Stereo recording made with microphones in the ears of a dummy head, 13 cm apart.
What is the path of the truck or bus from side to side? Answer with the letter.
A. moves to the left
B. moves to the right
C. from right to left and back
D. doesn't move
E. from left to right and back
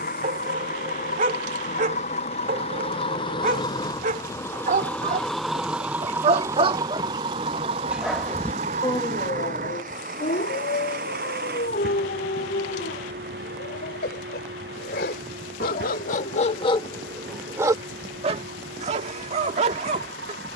B.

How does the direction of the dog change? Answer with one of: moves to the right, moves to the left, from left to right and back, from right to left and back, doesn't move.
from right to left and back.